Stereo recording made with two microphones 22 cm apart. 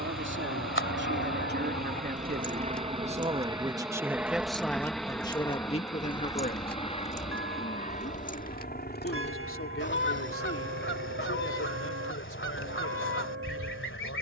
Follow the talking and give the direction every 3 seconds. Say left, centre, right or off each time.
right, centre, left, left, left.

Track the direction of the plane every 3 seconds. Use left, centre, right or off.
right, centre, left, left, left.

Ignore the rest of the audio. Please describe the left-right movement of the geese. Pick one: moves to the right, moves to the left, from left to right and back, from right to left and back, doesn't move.
from left to right and back.